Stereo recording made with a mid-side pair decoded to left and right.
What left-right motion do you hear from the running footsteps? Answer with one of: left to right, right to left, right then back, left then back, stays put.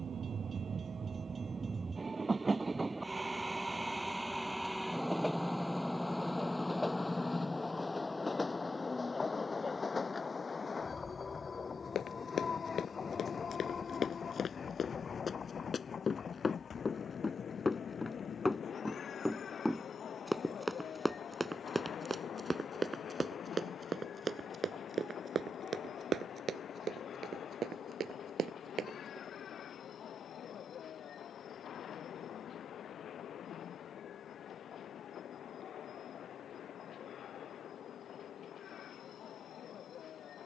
left to right.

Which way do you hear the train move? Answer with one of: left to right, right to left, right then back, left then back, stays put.
right to left.